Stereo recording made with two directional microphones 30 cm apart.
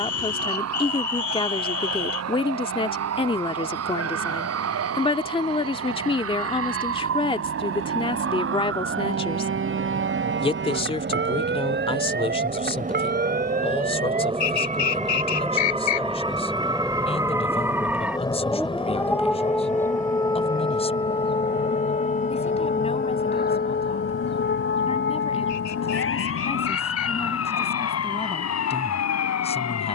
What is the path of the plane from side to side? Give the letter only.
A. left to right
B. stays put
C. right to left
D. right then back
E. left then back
C.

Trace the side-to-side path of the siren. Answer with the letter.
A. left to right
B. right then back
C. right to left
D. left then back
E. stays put
C.